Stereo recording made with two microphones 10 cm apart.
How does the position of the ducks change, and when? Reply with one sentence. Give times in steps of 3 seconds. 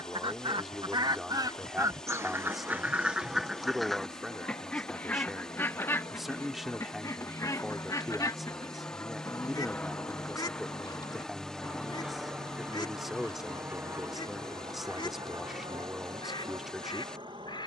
In this clip you hear the ducks on the right from 0 s, in the centre from 3 s and on the left from 6 s.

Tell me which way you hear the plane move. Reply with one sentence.
In this clip you hear the plane travel towards the right.